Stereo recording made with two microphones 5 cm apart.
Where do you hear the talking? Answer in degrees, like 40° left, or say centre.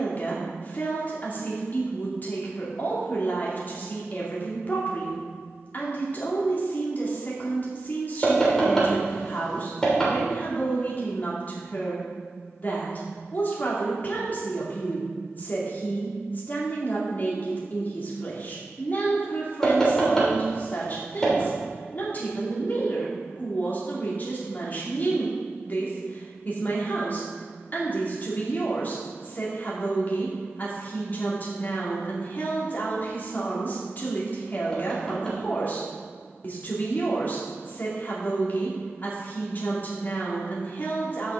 40° left.